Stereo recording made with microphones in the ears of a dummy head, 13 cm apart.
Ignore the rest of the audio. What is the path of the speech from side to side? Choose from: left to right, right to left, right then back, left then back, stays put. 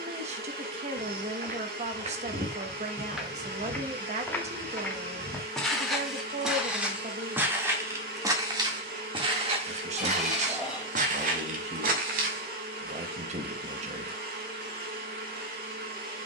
stays put.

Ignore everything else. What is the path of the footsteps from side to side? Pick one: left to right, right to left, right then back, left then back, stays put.
left then back.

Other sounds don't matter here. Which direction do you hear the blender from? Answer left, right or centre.
right.